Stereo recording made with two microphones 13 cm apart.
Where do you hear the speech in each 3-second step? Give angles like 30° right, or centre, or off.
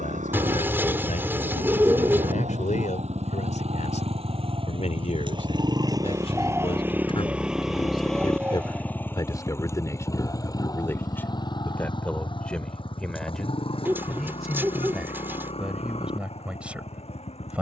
80° left, 60° left, 50° left, 20° left, centre, 10° right.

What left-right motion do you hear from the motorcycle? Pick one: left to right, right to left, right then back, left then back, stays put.
right to left.